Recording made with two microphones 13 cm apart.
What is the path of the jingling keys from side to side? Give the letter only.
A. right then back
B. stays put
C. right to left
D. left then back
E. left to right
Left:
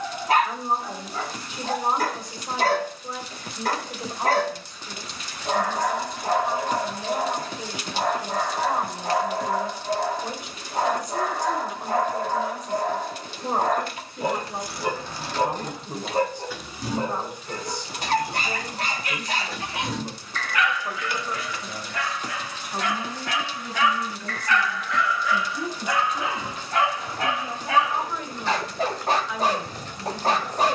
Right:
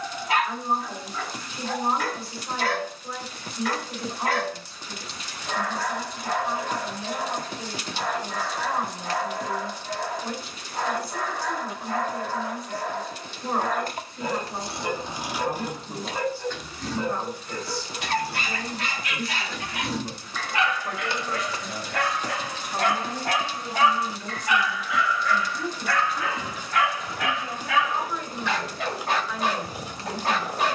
D.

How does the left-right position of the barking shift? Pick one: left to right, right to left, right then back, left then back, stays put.
right then back.